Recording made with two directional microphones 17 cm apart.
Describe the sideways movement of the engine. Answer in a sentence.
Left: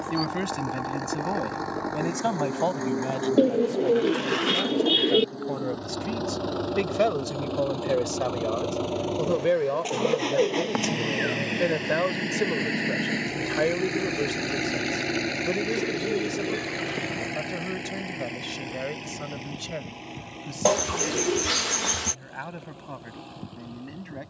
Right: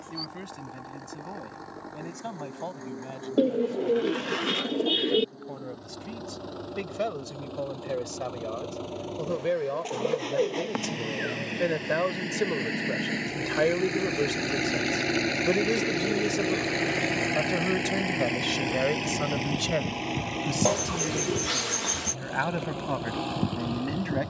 In this clip you hear the engine move to the right.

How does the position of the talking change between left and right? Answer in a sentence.
In this clip you hear the talking travel towards the right.